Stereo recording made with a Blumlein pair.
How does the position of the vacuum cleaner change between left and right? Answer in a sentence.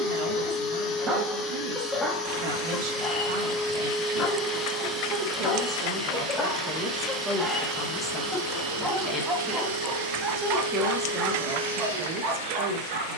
In this clip you hear the vacuum cleaner move to the right.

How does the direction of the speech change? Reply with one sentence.
You can hear the speech move from right to left and back again.